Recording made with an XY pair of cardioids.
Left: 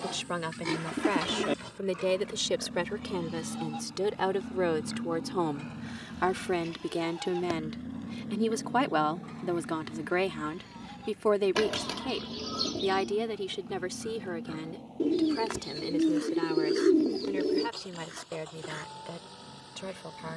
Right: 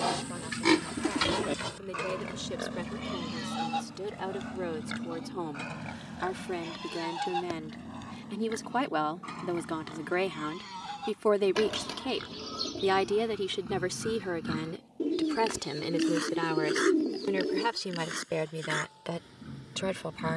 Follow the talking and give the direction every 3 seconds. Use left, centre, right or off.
left, left, left, centre, right, right, right.